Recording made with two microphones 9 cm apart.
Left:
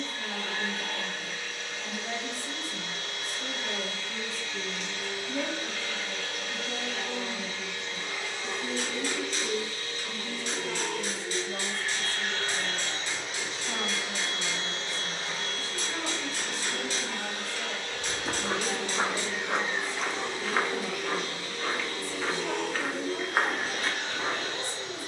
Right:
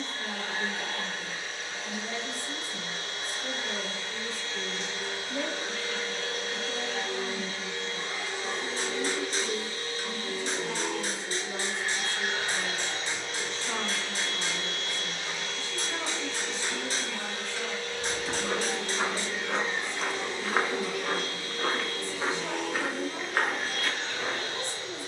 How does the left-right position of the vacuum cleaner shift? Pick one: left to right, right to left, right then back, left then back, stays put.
right to left.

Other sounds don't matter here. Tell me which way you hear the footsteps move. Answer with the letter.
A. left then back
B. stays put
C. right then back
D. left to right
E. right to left
C.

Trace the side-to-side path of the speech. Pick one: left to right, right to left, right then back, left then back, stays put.
left to right.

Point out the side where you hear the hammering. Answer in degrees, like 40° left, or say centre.
40° right.